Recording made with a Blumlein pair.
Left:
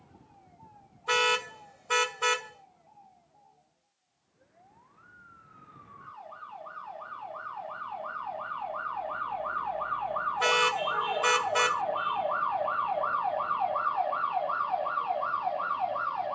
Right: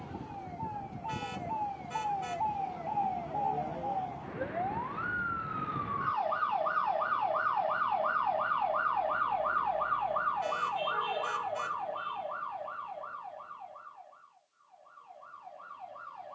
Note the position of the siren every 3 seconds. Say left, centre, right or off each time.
right, right, right, centre, left, left.